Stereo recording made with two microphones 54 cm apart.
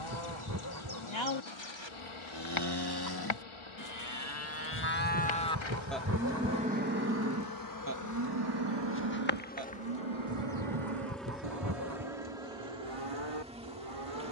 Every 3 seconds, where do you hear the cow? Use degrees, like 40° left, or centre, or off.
50° left, 30° left, 30° right, 60° right, 70° right.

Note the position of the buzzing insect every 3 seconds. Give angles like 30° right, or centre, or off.
60° left, 60° left, 40° left, 10° left, 10° right.